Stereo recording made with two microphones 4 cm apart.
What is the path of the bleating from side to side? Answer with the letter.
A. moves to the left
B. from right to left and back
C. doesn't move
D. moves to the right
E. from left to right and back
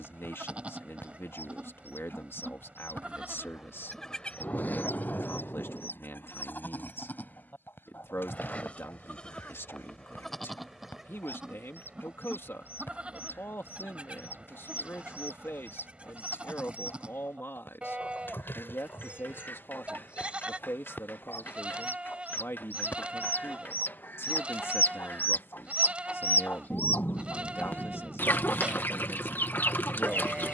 B.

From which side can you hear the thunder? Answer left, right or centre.
left.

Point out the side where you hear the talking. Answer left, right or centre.
left.